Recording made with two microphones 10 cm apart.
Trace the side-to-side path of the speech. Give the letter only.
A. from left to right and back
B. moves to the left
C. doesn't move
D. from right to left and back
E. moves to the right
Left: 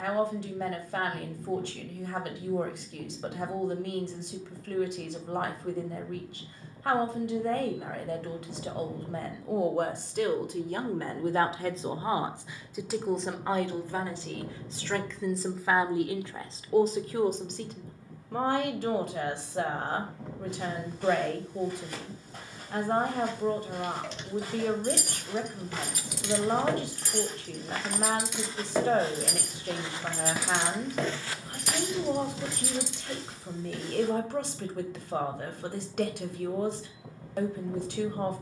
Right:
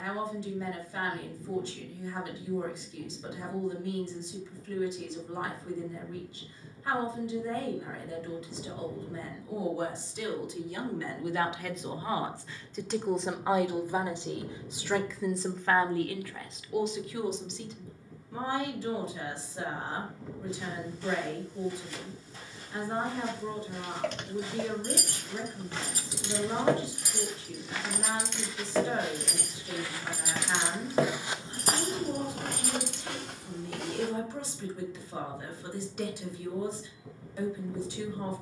A.